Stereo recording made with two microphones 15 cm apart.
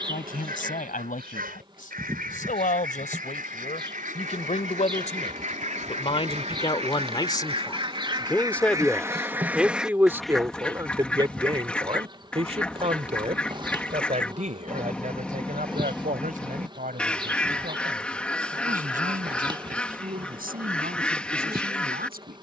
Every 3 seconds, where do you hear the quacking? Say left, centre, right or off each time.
right, right, right, centre, centre, centre, centre, centre.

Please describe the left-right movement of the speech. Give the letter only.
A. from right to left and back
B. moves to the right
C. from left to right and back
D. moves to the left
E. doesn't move
B.